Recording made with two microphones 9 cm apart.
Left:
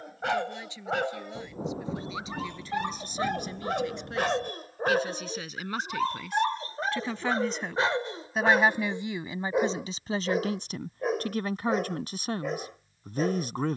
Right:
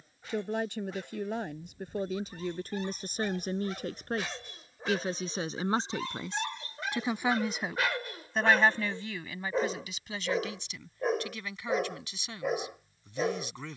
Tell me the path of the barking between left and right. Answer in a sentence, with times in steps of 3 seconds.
You can hear the barking on the left from 0 s and in the centre from 9 s.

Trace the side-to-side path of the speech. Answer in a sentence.
You can hear the speech travel towards the left.